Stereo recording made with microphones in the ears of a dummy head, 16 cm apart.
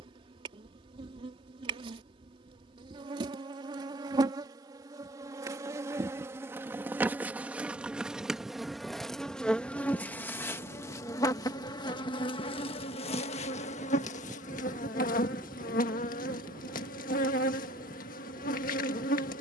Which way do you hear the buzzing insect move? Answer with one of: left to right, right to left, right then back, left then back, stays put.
right to left.